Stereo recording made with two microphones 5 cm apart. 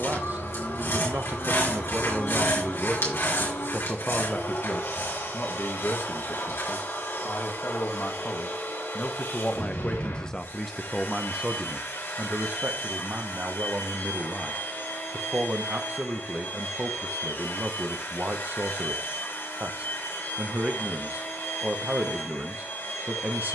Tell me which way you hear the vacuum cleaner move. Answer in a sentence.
In this clip you hear the vacuum cleaner stay in one place.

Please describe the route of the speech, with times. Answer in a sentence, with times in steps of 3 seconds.
You can hear the speech on the right from 0 s, on the left from 3 s, in the centre from 9 s and on the right from 12 s.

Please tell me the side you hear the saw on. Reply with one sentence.
In this clip you hear the saw on the left.